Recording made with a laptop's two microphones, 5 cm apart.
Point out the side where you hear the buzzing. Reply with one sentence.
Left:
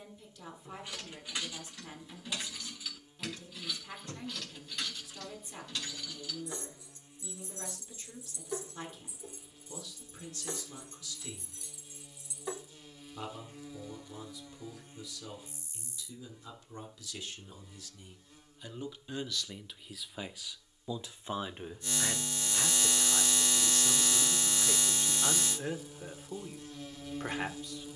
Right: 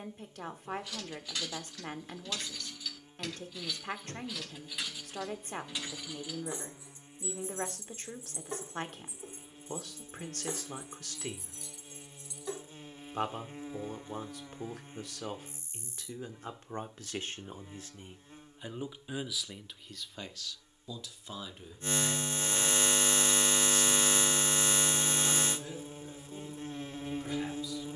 You can hear the buzzing on the right.